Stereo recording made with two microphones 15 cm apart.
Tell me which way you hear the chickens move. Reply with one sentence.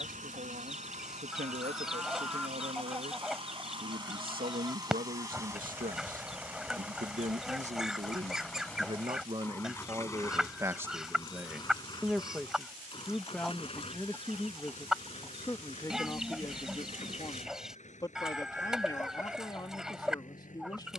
You can hear the chickens stay in one place.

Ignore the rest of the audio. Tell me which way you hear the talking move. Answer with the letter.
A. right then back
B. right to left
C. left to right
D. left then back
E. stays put
B.